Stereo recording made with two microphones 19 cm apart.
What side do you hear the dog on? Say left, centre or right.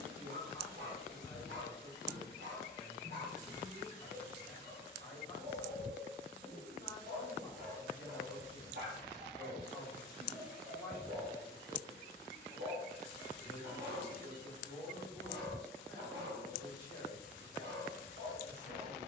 right.